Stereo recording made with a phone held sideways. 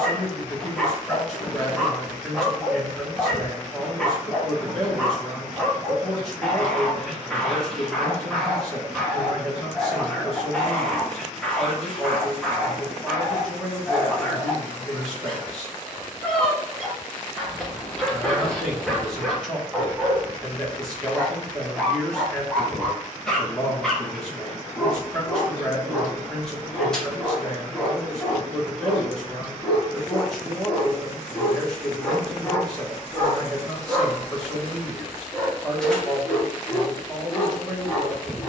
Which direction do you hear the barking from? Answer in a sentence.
You can hear the barking in the centre.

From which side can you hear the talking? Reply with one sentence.
In this clip you hear the talking in the centre.